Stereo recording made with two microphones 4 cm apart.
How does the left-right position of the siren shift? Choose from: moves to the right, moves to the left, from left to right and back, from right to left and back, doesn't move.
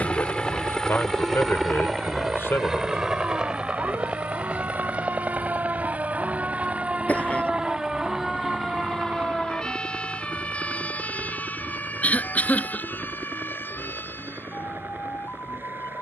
moves to the left.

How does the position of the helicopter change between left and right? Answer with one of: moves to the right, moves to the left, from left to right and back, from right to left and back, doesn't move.
moves to the right.